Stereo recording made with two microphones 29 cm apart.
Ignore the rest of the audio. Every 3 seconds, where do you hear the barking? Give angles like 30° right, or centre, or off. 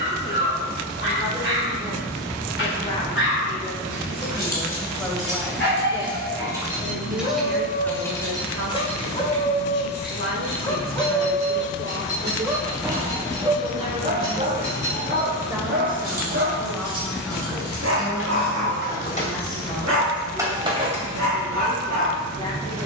40° left, 40° left, 30° left, 10° left, 20° right, 40° right, 60° right, 70° right.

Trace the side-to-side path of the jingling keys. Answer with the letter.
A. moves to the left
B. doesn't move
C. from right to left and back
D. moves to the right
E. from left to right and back
C.